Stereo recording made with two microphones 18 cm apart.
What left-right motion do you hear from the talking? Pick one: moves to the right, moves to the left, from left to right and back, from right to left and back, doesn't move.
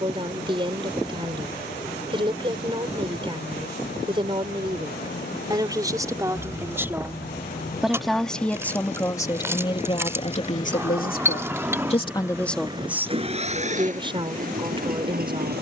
from right to left and back.